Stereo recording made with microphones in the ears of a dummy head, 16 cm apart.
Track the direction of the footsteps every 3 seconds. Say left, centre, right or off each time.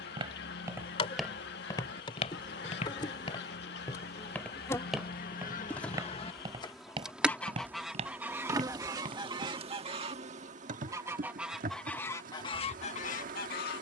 centre, centre, right, right, off.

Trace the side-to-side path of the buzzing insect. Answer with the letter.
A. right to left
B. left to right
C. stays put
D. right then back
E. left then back
B.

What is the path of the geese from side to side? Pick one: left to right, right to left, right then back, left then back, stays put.
right then back.